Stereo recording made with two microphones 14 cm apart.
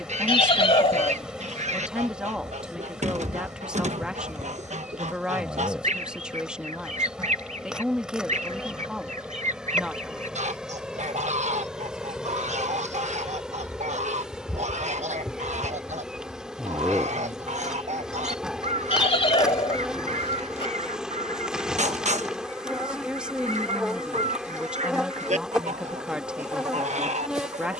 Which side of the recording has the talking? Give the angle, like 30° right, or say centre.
10° right.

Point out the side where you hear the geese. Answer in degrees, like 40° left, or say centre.
60° right.